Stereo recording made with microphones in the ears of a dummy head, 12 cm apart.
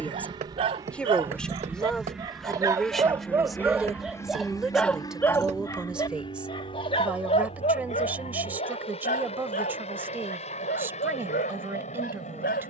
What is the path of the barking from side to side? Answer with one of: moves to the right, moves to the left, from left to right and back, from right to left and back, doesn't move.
moves to the left.